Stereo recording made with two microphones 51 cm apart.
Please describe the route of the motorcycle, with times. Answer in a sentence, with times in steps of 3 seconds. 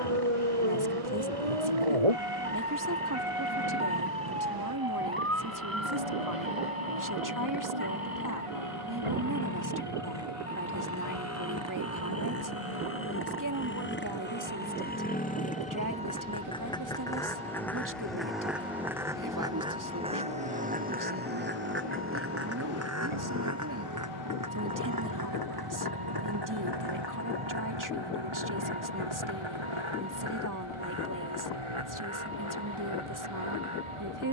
In this clip you hear the motorcycle on the left from 0 s, in the centre from 15 s and on the right from 21 s.